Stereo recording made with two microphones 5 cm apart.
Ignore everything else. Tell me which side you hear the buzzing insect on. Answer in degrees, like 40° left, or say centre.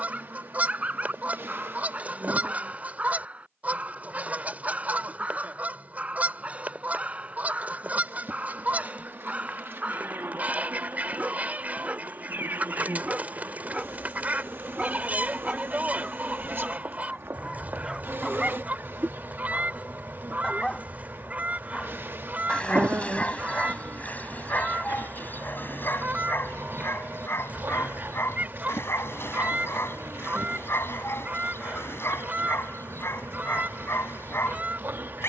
50° right.